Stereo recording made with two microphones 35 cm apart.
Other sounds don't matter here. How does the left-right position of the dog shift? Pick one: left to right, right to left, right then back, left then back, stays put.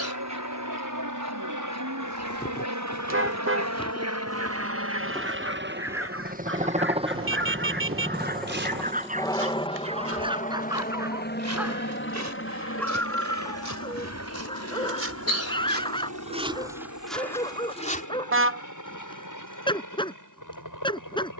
right to left.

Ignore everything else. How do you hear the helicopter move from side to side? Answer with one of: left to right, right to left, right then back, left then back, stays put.
right to left.